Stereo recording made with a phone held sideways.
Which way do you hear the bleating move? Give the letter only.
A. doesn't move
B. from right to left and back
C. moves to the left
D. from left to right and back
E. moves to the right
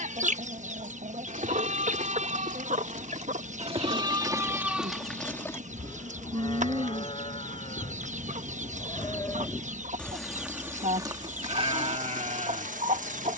B.